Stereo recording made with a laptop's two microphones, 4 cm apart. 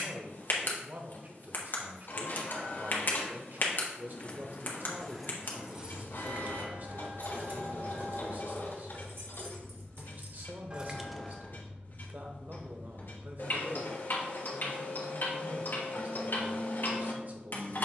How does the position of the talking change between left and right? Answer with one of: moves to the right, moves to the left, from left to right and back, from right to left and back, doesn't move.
doesn't move.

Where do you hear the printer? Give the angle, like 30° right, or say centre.
60° left.